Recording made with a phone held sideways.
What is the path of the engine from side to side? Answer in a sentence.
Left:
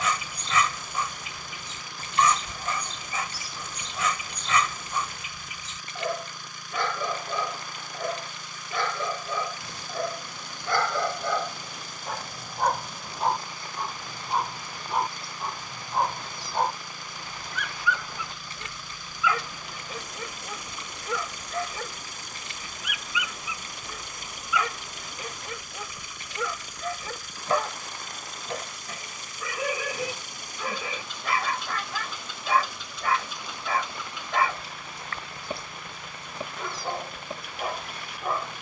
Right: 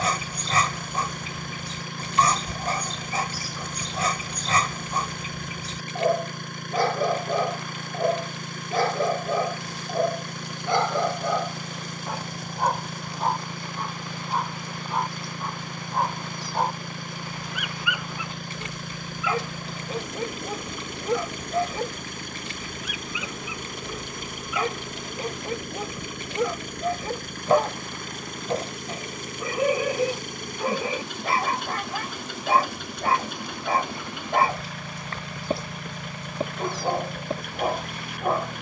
In this clip you hear the engine stay in one place.